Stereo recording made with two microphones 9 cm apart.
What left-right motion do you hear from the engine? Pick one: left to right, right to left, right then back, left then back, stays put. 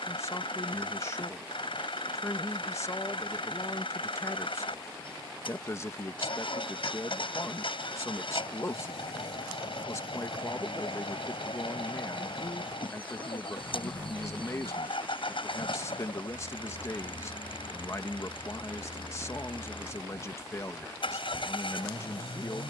stays put.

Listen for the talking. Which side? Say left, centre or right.
left.